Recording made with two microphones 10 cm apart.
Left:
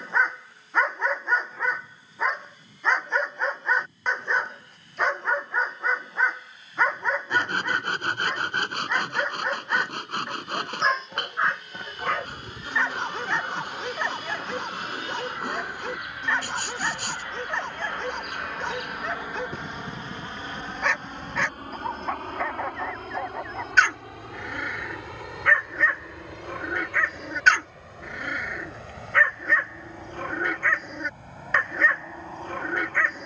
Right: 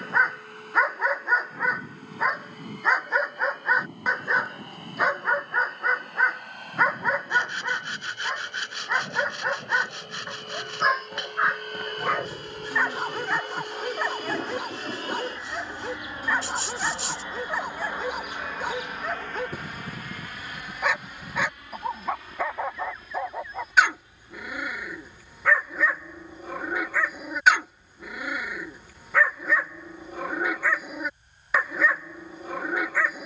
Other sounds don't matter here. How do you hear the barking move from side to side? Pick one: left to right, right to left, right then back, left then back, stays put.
stays put.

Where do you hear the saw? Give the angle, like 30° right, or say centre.
50° left.